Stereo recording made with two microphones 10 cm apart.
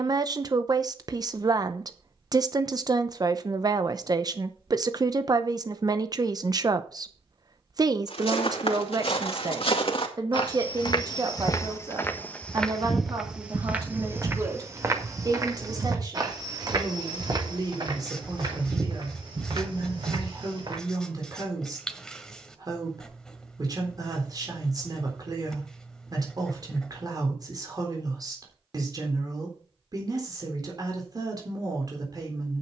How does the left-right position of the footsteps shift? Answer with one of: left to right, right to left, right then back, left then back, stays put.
left to right.